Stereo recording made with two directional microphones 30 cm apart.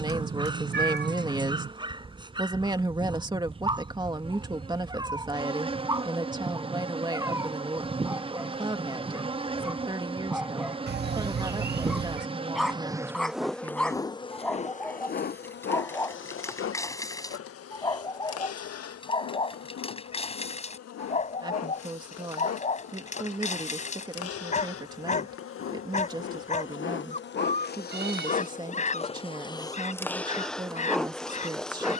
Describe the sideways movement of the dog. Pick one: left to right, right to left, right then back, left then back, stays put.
right to left.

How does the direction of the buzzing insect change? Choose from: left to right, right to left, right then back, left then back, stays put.
left then back.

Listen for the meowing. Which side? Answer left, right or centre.
right.